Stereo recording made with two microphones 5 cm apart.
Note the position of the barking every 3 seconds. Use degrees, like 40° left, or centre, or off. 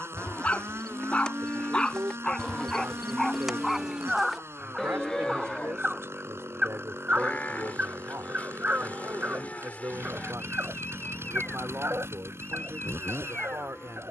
20° left, 10° right, 30° right, 50° right, 50° right.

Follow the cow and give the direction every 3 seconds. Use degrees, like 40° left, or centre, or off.
20° left, centre, 30° left, 30° left, 30° left.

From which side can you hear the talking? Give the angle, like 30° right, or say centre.
80° right.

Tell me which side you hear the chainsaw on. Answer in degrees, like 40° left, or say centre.
70° right.